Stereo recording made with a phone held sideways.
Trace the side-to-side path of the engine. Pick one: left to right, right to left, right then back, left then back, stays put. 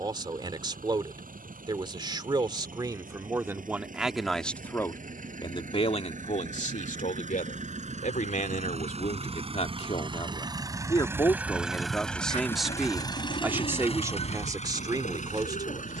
right to left.